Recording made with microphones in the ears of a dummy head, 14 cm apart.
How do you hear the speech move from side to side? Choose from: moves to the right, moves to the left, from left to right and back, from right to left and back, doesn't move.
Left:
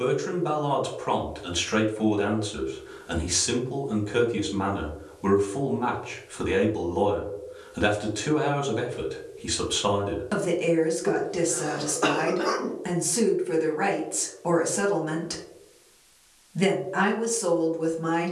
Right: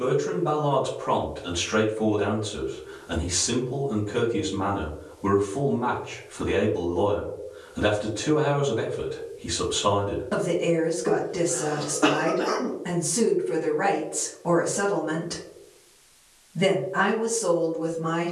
doesn't move.